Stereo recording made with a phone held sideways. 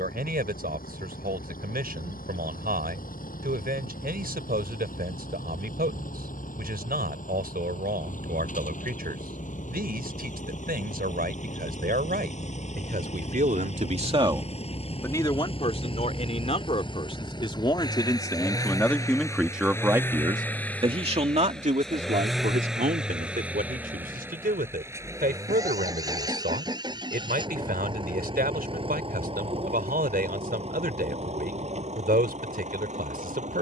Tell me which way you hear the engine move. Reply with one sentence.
In this clip you hear the engine go from the left side to the right.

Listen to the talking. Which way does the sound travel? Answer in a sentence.
You can hear the talking go left and come back.